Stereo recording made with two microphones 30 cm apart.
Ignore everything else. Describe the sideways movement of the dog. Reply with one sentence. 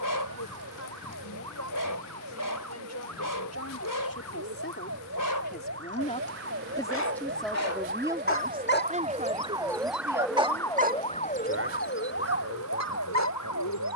In this clip you hear the dog move from left to right.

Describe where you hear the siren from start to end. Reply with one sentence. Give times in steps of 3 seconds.
In this clip you hear the siren on the right from 0 s, in the centre from 9 s and on the left from 12 s.